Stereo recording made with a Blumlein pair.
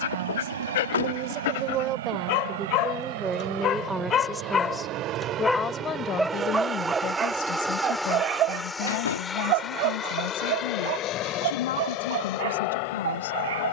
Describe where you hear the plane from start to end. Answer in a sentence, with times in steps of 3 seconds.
You can hear the plane on the right from 0 s, in the centre from 6 s and on the left from 9 s.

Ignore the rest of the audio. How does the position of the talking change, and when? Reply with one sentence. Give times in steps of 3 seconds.
In this clip you hear the talking on the right from 0 s, in the centre from 3 s and on the left from 6 s.